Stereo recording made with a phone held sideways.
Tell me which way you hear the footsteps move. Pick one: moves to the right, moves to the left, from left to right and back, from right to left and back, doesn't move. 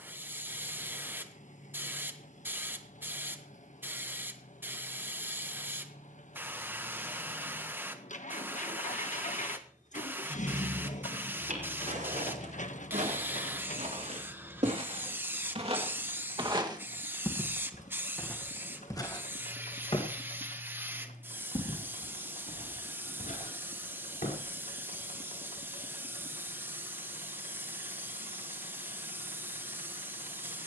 moves to the left.